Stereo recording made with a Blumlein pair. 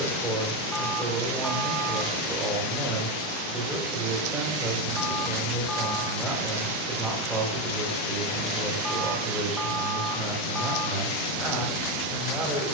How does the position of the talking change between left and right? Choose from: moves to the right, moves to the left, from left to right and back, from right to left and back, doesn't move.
doesn't move.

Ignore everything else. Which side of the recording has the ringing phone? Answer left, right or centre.
centre.